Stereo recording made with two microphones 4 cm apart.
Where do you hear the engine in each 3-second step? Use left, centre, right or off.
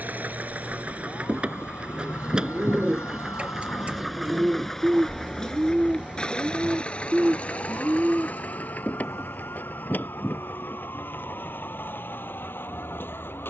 right, centre, left, left, left.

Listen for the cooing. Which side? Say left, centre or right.
right.